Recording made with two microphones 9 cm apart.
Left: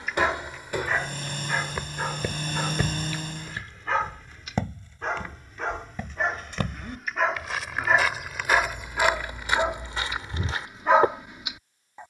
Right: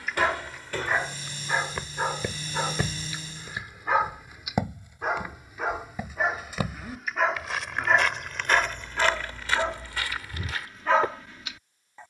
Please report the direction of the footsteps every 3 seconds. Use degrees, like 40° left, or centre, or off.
10° left, 10° right, centre, 20° left.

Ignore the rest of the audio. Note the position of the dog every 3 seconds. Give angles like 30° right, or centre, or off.
10° right, 10° right, centre, 20° left.